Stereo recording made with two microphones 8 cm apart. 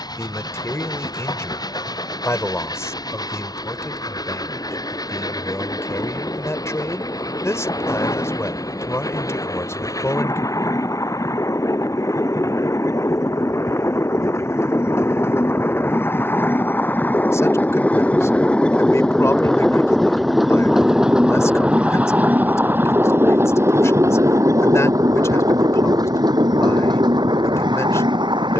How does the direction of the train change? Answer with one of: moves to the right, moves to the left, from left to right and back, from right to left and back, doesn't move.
moves to the right.